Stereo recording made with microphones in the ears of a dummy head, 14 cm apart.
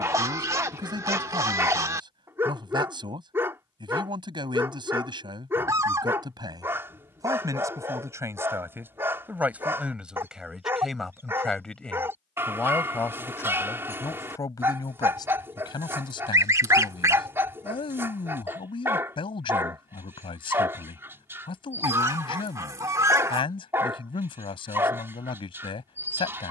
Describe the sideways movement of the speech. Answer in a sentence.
You can hear the speech travel towards the left.